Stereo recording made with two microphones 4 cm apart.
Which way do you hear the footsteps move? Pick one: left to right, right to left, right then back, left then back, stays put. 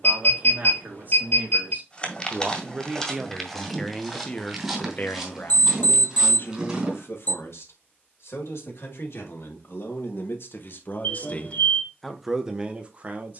left to right.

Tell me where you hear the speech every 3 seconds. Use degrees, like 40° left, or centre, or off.
40° right, 20° left, 70° left, 60° left, 20° right.